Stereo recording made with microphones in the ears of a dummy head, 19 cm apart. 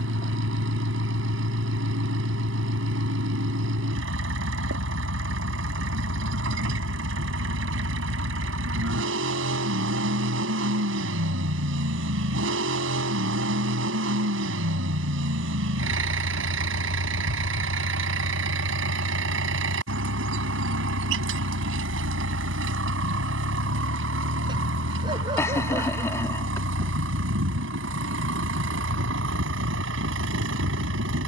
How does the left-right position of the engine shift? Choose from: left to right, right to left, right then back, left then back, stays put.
stays put.